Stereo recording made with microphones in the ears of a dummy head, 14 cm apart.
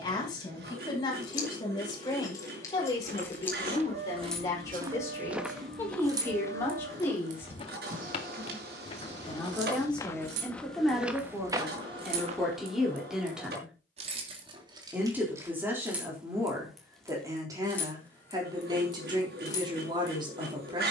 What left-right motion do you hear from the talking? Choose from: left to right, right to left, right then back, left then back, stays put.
left to right.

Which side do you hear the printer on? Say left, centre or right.
right.